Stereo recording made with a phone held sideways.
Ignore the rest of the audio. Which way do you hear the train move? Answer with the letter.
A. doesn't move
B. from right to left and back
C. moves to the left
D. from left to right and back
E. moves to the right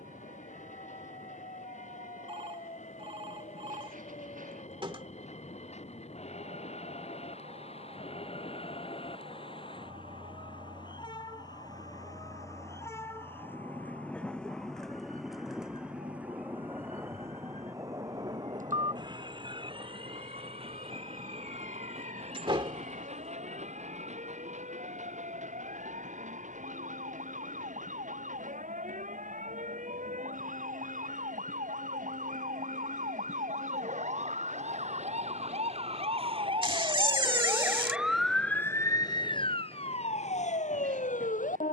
E.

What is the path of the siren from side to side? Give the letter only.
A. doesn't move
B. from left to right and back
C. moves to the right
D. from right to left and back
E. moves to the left
E.